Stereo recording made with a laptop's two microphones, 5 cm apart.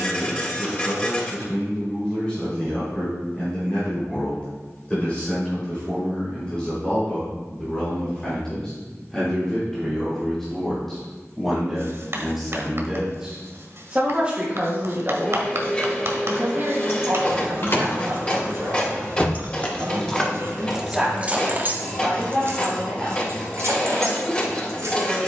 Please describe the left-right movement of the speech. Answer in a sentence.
In this clip you hear the speech move from left to right and back again.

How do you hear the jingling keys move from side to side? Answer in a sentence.
In this clip you hear the jingling keys move from left to right.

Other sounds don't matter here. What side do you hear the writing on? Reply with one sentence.
In this clip you hear the writing on the right.